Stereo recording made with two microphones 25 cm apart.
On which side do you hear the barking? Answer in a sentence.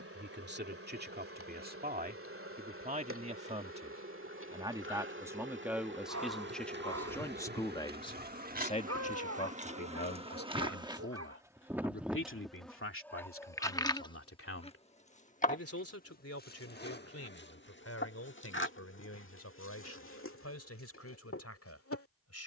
You can hear the barking on the right.